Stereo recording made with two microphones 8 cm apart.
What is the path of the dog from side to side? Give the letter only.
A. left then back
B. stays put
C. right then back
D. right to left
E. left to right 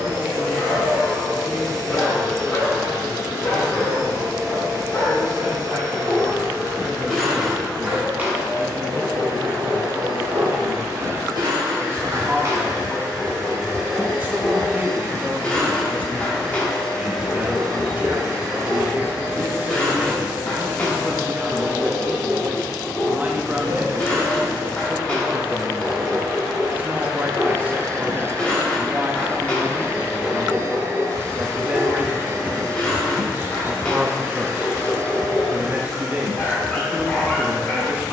C.